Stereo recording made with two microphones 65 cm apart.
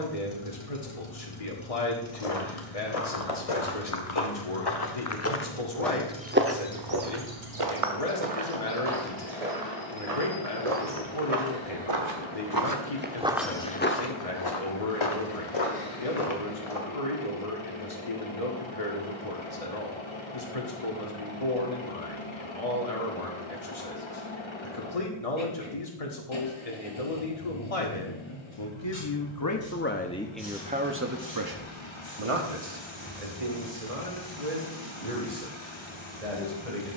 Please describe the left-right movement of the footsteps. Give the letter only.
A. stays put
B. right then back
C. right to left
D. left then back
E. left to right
B.